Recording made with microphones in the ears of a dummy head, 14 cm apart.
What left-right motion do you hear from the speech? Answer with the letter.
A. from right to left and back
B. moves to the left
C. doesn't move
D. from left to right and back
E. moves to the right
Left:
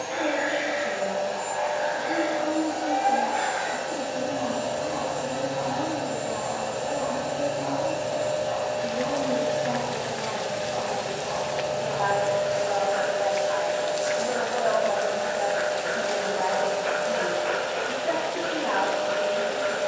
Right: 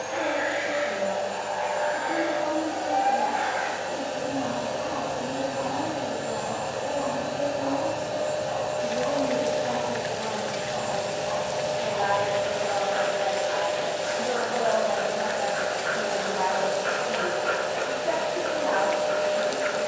D.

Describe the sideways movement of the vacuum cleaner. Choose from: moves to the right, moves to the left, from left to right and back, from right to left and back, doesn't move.
moves to the right.